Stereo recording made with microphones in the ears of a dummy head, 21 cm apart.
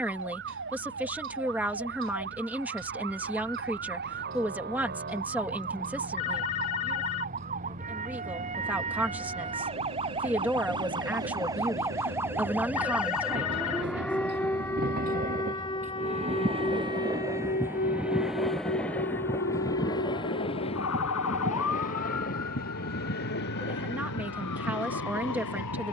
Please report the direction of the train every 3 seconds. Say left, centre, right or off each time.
right, right, right, right, right, right, centre, left, left.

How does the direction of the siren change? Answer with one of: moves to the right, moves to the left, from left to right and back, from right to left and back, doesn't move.
moves to the left.